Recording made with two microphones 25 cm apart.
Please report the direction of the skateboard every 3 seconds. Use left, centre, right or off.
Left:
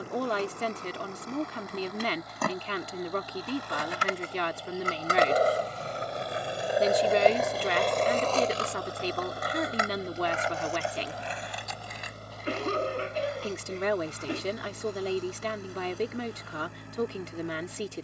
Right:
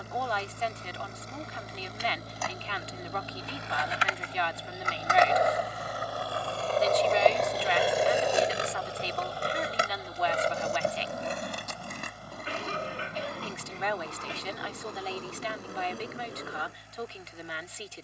left, left, centre, right, right, right.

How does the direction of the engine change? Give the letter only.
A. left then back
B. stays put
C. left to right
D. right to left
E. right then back
D.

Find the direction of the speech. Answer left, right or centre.
left.